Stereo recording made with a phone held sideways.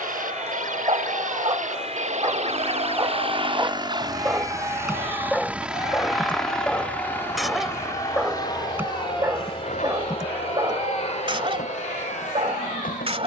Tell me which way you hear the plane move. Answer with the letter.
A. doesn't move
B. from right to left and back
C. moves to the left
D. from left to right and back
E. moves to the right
C.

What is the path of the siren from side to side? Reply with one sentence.
In this clip you hear the siren move from right to left.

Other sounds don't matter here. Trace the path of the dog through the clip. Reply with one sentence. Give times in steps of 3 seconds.
In this clip you hear the dog on the right from 0 s, in the centre from 3 s and on the right from 9 s.